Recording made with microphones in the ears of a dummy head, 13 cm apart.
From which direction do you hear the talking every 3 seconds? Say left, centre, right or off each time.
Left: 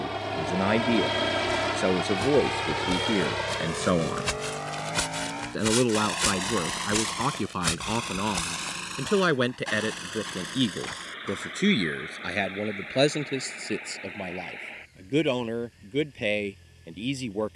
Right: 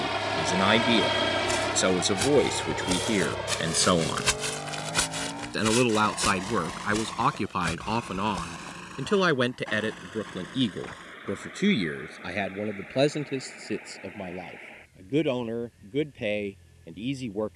right, right, right, centre, left, left.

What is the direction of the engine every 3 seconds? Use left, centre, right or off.
centre, left, left, left, left, left.